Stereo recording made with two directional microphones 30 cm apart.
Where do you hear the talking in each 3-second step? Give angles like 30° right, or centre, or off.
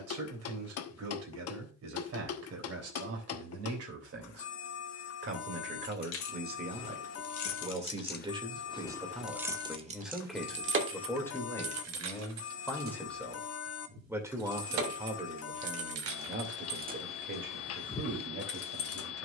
60° right, 50° right, 20° right, centre, centre, 40° right, 50° right.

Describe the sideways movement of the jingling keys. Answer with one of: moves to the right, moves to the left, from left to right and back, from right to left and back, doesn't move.
from left to right and back.